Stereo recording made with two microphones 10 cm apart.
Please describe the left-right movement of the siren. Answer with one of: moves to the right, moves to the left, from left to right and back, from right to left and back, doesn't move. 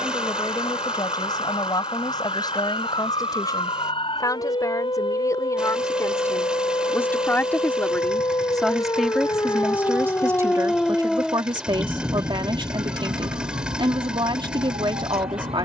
moves to the right.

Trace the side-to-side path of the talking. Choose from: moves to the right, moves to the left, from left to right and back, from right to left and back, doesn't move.
moves to the right.